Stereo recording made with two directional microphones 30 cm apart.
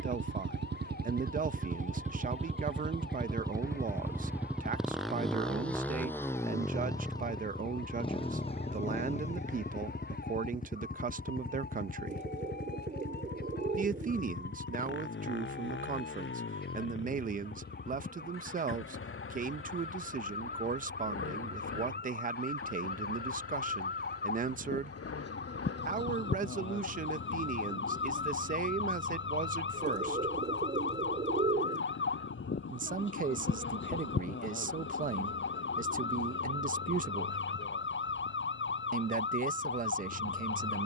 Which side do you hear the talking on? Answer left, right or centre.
right.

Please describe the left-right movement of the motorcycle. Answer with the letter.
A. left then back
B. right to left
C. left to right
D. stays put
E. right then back
B.